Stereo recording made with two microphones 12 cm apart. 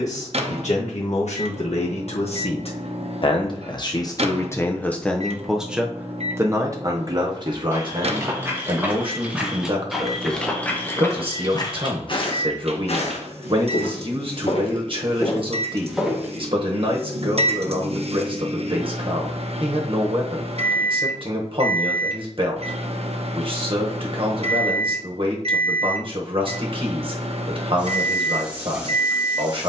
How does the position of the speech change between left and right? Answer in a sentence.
You can hear the speech move to the right.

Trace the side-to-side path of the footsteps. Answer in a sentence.
You can hear the footsteps move from right to left and back again.